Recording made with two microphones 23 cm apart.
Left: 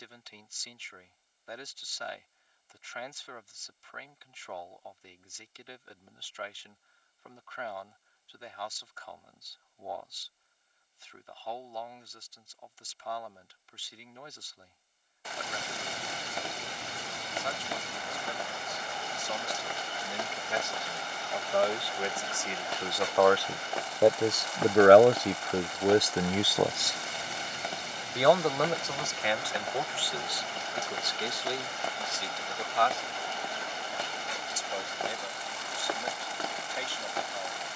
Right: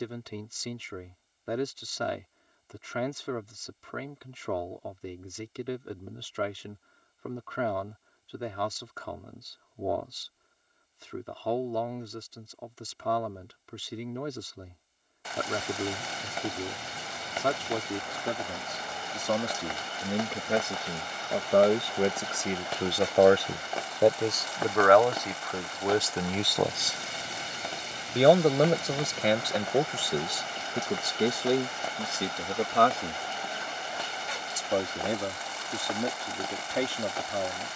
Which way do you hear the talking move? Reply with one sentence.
In this clip you hear the talking go left and come back.